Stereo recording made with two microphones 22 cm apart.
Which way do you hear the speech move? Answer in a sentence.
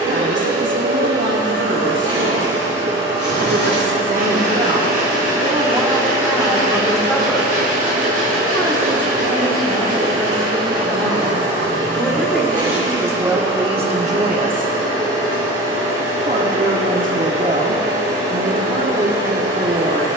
In this clip you hear the speech go left and come back.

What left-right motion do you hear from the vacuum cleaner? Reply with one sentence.
You can hear the vacuum cleaner stay in one place.